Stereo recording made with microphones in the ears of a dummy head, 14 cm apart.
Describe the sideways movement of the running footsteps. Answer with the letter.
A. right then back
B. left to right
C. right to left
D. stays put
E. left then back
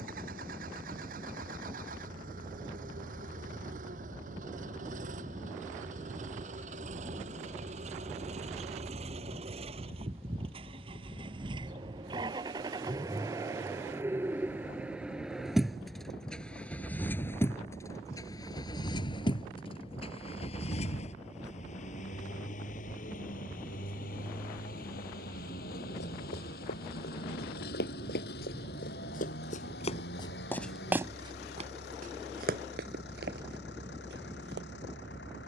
B.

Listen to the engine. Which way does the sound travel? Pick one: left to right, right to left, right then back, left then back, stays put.
right to left.